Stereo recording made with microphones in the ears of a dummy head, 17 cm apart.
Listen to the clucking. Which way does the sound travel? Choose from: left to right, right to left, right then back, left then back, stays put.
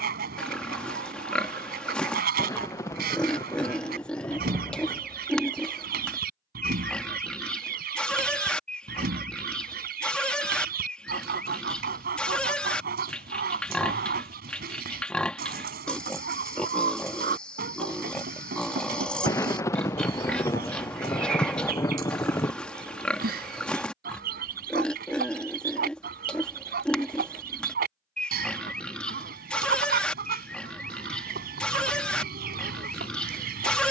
stays put.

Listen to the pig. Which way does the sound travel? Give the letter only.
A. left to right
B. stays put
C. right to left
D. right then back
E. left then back
B.